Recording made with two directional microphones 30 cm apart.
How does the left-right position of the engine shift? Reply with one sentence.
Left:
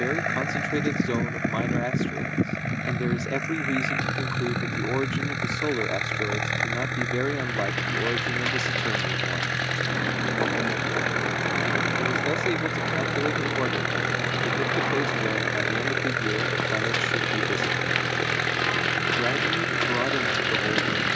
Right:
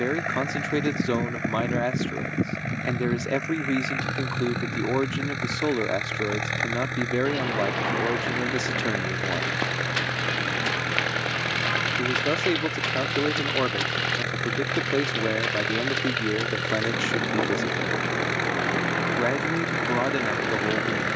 You can hear the engine stay put.